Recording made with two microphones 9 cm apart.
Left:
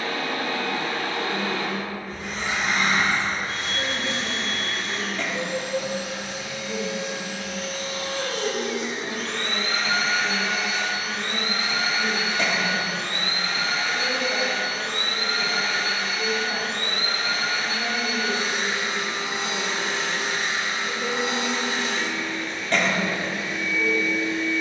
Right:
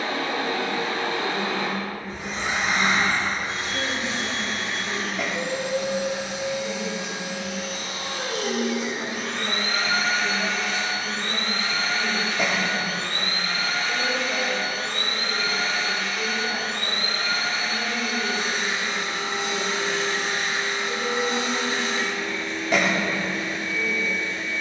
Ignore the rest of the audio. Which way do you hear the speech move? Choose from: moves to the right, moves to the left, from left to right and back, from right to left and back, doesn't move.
moves to the left.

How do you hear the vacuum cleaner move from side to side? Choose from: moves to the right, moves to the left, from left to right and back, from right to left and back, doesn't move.
moves to the left.